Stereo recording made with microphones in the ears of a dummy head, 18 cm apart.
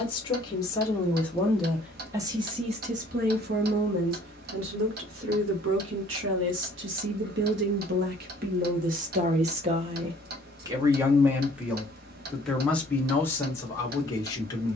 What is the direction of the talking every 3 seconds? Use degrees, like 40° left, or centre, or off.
centre, 70° right, 60° right, 20° right, 10° left.